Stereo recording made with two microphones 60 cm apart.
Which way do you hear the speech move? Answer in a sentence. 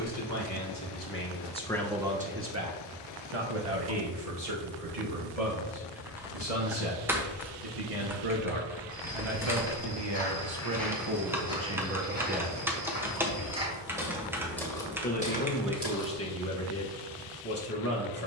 You can hear the speech move from left to right and back again.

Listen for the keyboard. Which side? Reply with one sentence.
You can hear the keyboard in the centre.